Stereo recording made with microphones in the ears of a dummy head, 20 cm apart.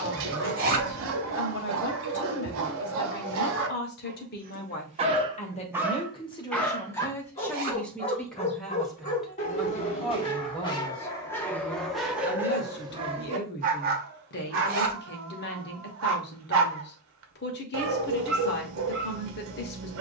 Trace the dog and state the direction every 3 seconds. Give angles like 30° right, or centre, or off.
60° right, 40° right, 20° left, 20° left, 30° right, 60° right, 60° right.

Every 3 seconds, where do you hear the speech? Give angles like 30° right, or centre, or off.
50° left, 40° left, 10° left, 10° left, 50° left, 50° left, 50° left.